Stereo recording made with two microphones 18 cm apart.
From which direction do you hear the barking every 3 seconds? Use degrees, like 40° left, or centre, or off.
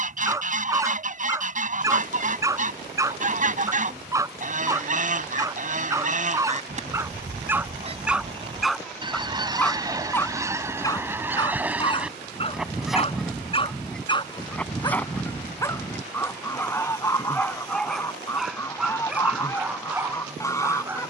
20° right, 20° right, 10° right, 20° left, 30° left, 10° left, 10° right.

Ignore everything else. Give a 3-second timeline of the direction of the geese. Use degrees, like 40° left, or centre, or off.
40° right, 40° right, 40° right, 20° right, centre, 10° left, 20° left.